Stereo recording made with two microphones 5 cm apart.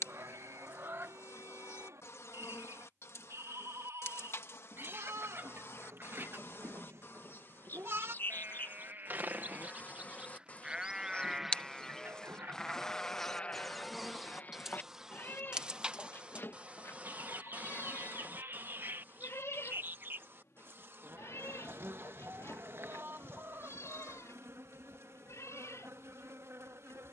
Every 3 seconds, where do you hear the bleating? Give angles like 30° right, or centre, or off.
80° right, 70° right, 50° right, 20° right, 20° left, 50° left, 60° left, 60° left, 70° left.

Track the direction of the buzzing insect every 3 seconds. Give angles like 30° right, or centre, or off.
60° left, 60° left, 40° left, 30° left, centre, 20° right, 40° right, 50° right, 60° right.